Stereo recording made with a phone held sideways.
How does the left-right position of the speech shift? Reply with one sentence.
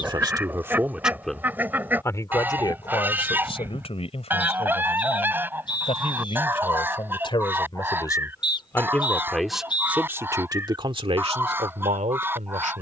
In this clip you hear the speech go left and come back.